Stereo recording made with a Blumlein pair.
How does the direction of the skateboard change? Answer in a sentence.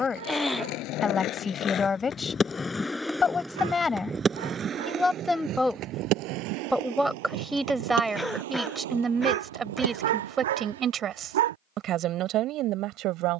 You can hear the skateboard travel towards the right.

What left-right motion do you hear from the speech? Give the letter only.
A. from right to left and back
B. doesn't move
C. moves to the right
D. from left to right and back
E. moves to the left
C.